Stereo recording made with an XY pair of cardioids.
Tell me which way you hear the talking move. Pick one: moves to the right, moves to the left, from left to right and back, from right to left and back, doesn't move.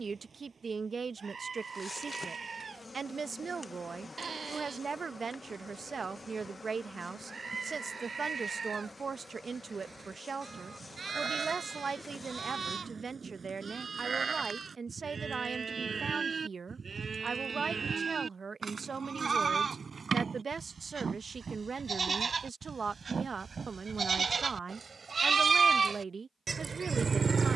doesn't move.